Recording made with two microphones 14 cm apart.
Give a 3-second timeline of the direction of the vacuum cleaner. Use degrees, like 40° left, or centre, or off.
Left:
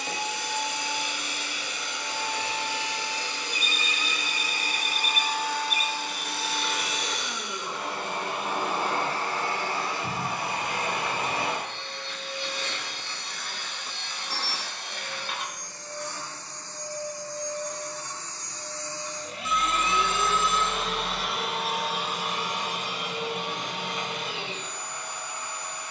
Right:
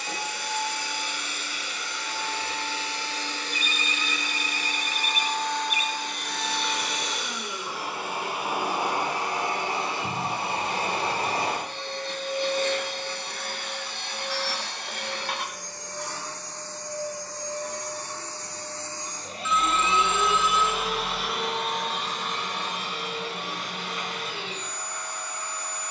20° left, 10° left, centre, 30° right, 60° right, 70° right, 40° right, 10° left, 20° left.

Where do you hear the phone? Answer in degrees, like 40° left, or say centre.
40° left.